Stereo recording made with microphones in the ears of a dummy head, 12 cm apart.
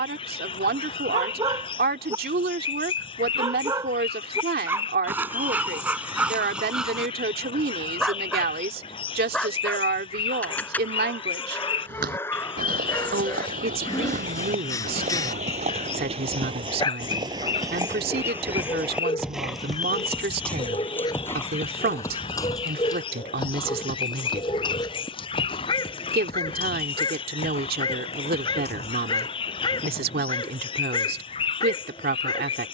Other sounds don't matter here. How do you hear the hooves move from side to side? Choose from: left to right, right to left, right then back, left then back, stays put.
right to left.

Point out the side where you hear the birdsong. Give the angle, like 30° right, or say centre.
40° left.